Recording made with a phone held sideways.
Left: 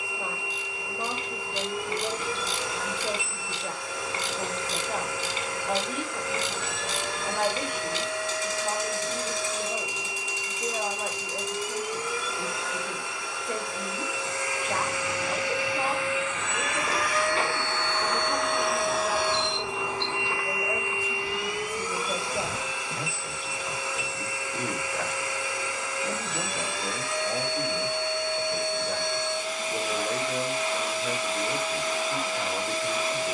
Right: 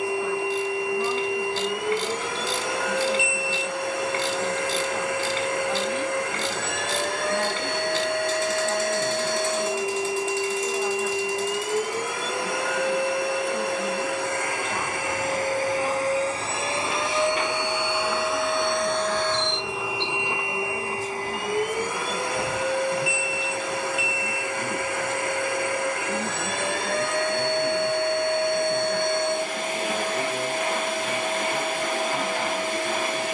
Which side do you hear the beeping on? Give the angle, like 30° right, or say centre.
70° right.